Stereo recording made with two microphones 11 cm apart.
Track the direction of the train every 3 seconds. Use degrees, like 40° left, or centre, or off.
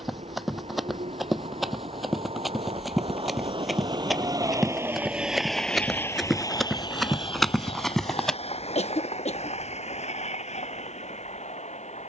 70° right, 30° right, 50° left, 70° left.